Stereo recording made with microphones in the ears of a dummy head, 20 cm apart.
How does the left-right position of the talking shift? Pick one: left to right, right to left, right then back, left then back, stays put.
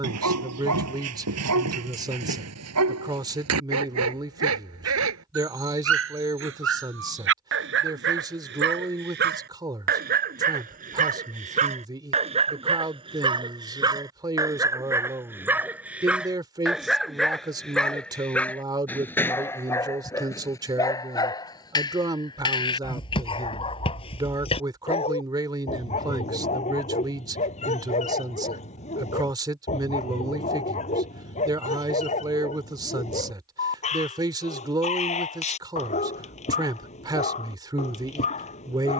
stays put.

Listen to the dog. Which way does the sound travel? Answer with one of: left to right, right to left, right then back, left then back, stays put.
right to left.